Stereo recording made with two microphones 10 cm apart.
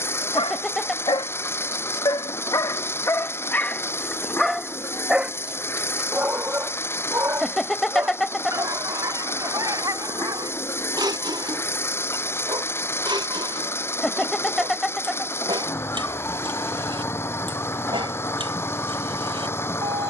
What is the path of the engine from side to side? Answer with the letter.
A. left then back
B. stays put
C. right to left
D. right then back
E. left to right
B.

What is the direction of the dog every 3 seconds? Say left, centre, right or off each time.
left, centre, right, right, right, right, right.